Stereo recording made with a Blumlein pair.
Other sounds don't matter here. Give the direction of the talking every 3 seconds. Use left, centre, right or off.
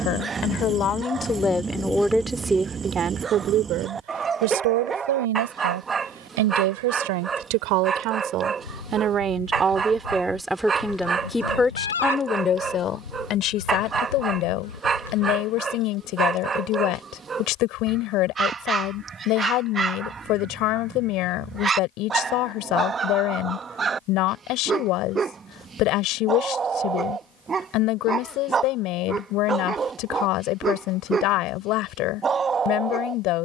centre, right, right, centre, left, left, left, left, left, left, left.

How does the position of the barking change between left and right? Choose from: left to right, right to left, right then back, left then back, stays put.
stays put.